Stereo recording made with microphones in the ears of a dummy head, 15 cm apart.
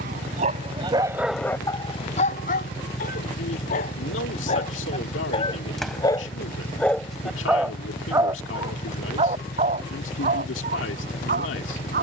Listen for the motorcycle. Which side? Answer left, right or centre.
left.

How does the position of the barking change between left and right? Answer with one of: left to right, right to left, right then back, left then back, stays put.
left then back.